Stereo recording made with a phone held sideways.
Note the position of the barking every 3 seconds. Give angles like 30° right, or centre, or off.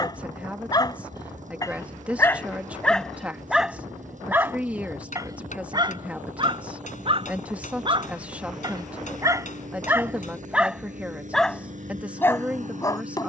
20° left, 20° right, 40° right, 10° right, 20° left.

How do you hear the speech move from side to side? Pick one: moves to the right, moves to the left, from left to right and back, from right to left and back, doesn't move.
doesn't move.